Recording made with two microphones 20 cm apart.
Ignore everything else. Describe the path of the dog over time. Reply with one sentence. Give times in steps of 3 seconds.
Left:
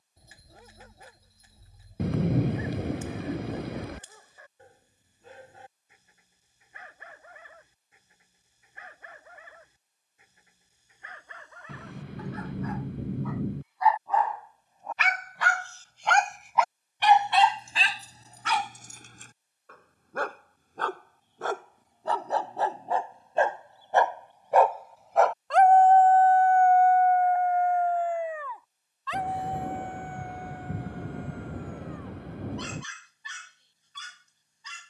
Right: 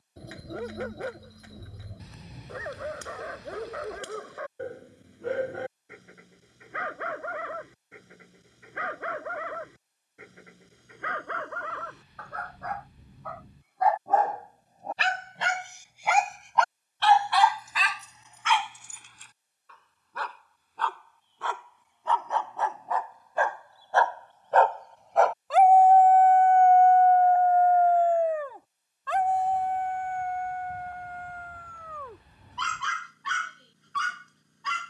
In this clip you hear the dog on the right from 0 s, in the centre from 15 s, on the left from 18 s, in the centre from 24 s and on the right from 27 s.